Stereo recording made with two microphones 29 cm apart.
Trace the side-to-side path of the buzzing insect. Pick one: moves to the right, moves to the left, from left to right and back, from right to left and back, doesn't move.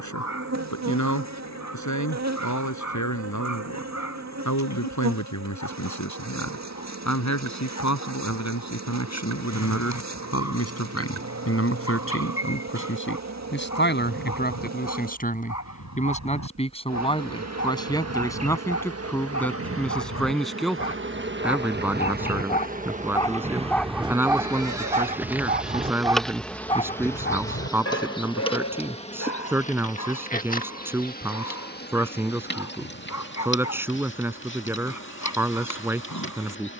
moves to the left.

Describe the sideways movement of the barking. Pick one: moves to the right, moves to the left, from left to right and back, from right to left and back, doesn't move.
from left to right and back.